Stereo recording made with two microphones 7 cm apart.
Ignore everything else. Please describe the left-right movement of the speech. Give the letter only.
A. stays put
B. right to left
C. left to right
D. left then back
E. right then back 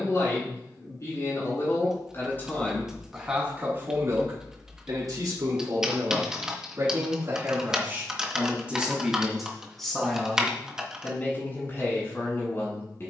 E.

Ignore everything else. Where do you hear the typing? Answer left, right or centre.
centre.